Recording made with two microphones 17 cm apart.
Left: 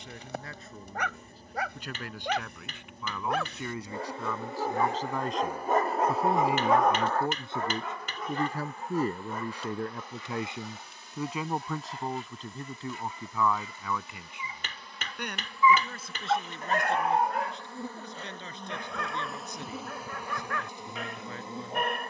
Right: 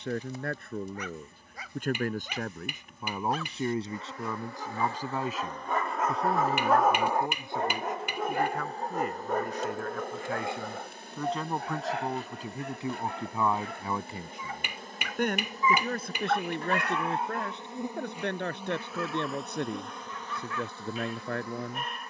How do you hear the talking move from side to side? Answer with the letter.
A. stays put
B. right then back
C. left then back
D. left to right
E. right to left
C.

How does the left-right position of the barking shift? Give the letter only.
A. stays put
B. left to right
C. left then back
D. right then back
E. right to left
D.